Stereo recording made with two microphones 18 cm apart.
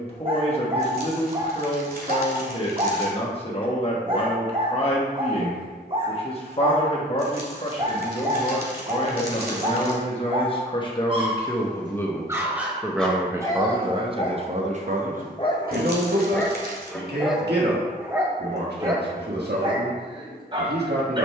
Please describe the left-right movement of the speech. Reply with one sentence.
In this clip you hear the speech move to the right.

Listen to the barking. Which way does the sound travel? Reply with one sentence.
You can hear the barking move from right to left and back again.